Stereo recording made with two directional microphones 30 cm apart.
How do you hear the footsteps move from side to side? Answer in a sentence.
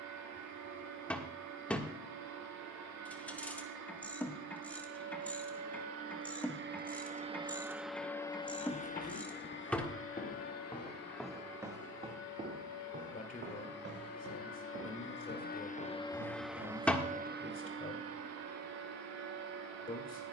You can hear the footsteps go from the left side to the right.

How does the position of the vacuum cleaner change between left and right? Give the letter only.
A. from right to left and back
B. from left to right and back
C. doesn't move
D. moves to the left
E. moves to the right
A.